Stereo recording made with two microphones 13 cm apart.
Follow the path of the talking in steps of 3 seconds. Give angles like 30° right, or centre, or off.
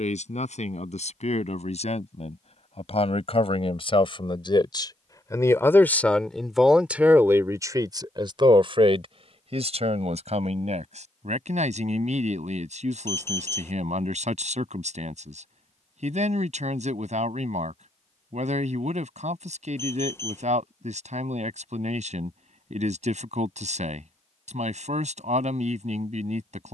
60° left, 40° left, 20° right, 60° right, 70° right, 70° right, 70° right, 70° right, 70° right.